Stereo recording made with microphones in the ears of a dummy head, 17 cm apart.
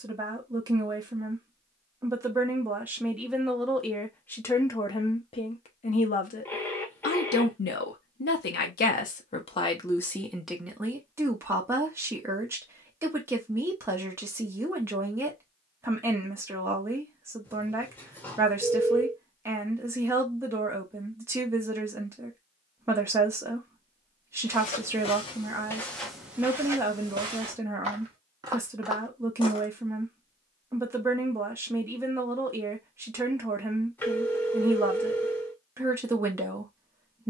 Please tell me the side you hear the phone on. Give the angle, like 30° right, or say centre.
10° left.